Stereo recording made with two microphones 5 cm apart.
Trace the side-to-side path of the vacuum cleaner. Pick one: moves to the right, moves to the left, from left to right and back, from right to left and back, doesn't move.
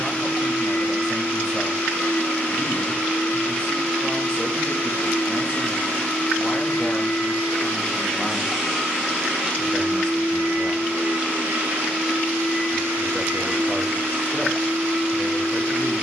moves to the right.